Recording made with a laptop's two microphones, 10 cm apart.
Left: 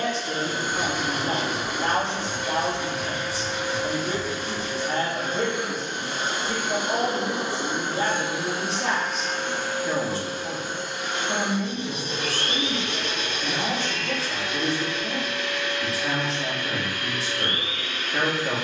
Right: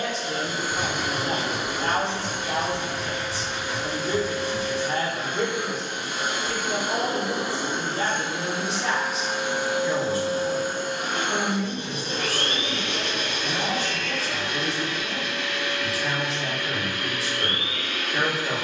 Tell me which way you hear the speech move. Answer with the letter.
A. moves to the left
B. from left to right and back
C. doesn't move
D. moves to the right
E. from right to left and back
C.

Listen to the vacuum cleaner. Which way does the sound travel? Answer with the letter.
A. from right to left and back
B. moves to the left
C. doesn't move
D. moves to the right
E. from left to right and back
D.